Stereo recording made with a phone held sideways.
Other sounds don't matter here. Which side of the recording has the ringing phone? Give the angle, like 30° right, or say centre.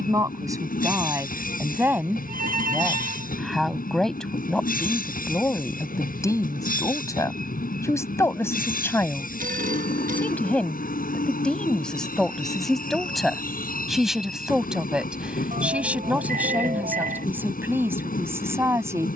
70° right.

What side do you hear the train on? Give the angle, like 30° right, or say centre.
80° left.